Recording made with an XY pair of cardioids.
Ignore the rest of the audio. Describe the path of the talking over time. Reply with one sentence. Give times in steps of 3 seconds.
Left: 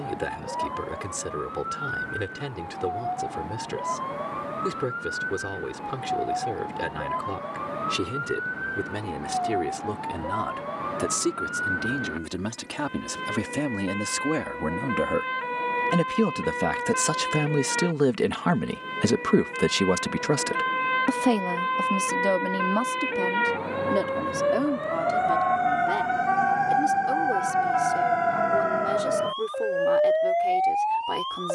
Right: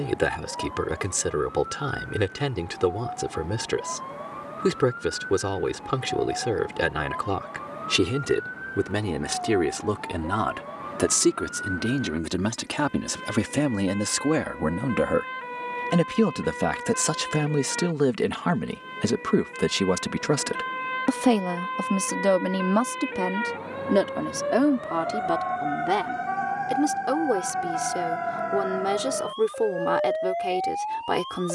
In this clip you hear the talking on the right from 0 s, in the centre from 15 s and on the right from 21 s.